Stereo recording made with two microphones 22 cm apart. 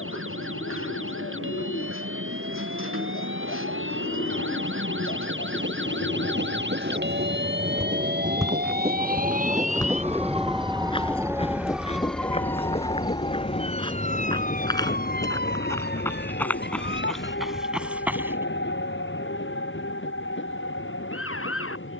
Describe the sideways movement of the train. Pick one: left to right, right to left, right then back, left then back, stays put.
right to left.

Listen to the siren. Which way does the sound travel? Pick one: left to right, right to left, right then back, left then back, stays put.
right to left.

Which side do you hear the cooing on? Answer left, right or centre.
left.